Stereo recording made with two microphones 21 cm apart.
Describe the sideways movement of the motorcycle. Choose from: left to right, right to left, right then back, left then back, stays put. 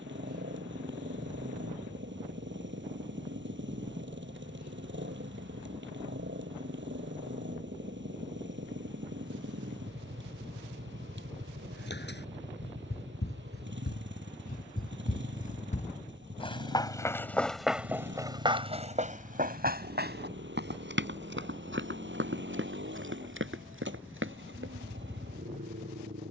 stays put.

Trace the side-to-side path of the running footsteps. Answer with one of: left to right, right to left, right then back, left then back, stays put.
left to right.